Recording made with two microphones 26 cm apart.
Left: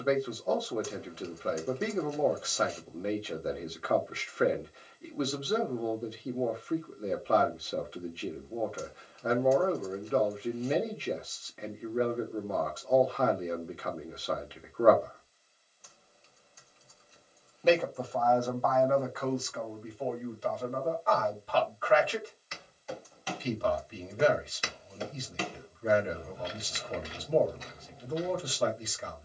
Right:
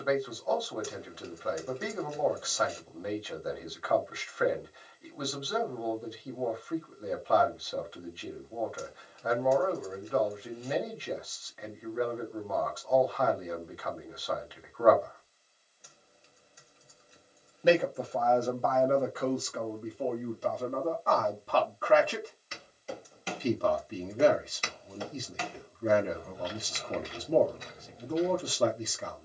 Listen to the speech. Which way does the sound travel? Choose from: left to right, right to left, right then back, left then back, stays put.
left to right.